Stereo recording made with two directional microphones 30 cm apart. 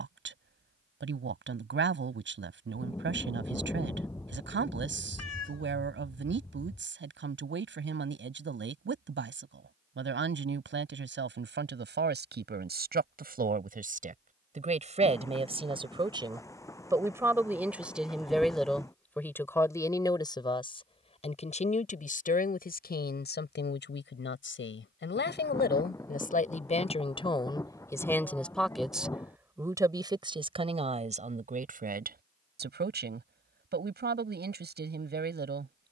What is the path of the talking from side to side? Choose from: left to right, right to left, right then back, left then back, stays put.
left then back.